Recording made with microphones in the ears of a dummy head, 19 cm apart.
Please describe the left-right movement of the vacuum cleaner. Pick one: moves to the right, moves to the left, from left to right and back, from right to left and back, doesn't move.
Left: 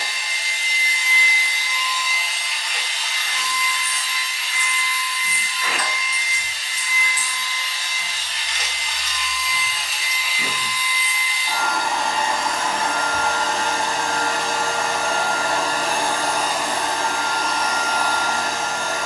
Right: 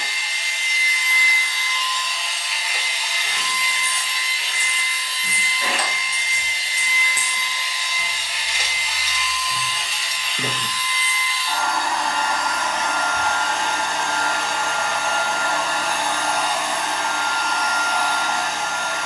from left to right and back.